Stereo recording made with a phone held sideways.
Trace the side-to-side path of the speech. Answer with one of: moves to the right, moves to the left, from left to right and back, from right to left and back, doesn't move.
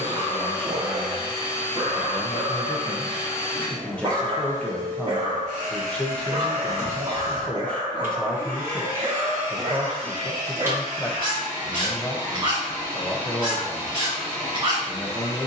doesn't move.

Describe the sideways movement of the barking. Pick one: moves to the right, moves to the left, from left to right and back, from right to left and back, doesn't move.
doesn't move.